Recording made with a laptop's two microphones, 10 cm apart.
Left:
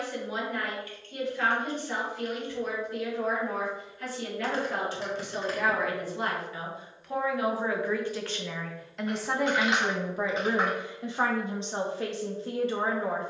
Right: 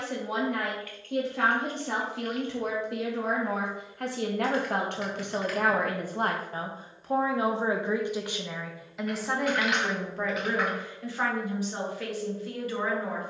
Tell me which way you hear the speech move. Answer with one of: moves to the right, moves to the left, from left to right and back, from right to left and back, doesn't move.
moves to the left.